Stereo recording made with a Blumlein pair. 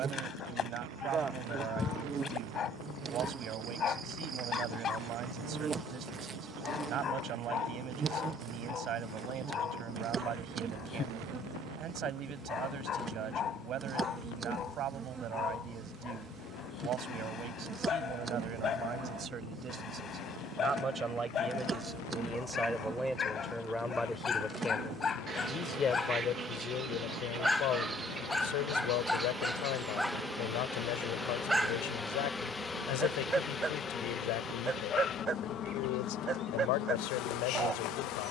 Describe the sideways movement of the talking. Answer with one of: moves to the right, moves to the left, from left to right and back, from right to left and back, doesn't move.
moves to the left.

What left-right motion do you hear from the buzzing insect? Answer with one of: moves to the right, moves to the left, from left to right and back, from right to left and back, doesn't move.
moves to the left.